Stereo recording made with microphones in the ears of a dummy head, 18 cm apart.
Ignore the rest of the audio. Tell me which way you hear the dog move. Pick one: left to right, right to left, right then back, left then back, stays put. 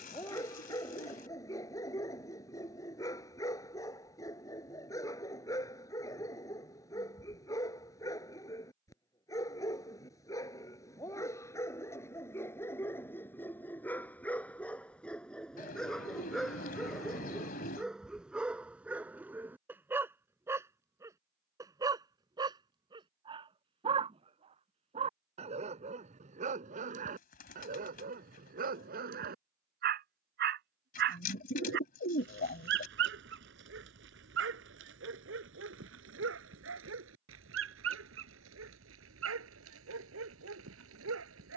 left to right.